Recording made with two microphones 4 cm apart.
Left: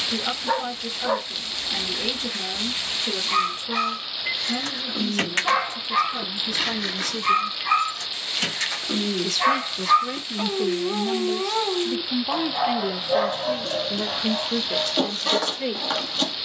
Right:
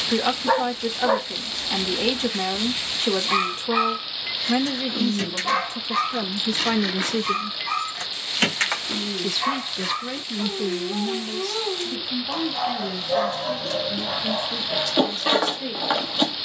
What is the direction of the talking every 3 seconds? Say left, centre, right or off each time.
right, right, right, centre, left, left.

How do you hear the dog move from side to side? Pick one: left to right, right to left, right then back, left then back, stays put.
left then back.